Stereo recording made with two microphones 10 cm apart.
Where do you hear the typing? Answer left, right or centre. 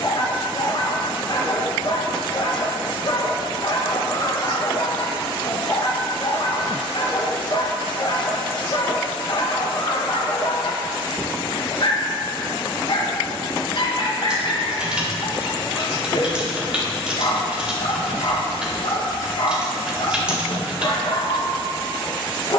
centre.